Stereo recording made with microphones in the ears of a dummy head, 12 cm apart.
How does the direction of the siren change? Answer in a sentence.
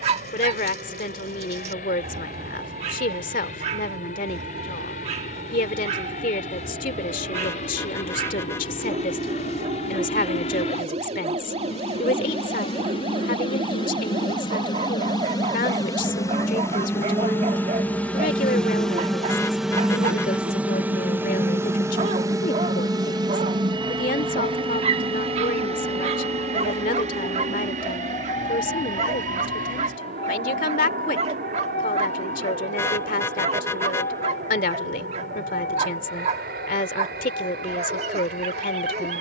In this clip you hear the siren go from the right side to the left.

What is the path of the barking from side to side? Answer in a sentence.
You can hear the barking stay in one place.